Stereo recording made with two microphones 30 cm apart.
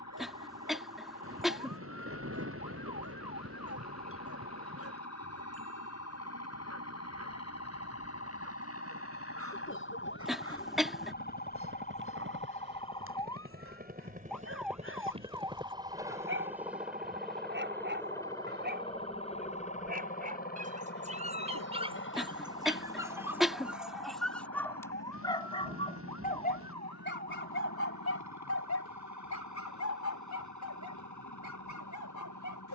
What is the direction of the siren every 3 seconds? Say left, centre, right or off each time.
left, left, left, left, centre, right, right, right, right, right, right.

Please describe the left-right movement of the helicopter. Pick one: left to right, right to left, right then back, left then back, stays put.
right to left.